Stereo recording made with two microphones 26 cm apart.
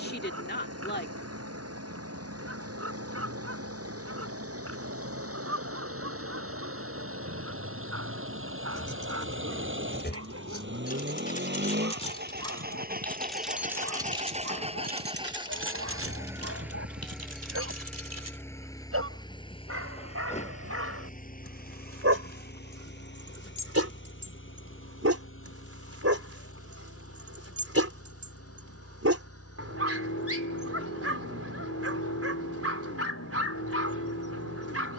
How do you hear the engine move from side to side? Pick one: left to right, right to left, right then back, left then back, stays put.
right to left.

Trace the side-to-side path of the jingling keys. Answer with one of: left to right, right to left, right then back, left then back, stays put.
left to right.